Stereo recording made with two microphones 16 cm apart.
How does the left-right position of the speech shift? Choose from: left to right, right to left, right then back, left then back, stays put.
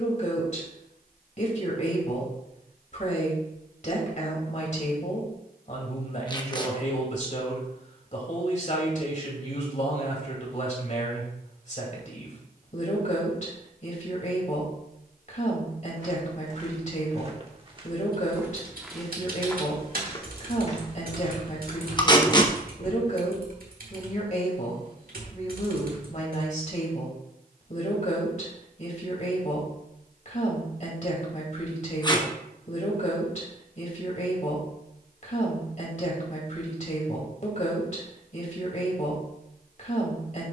stays put.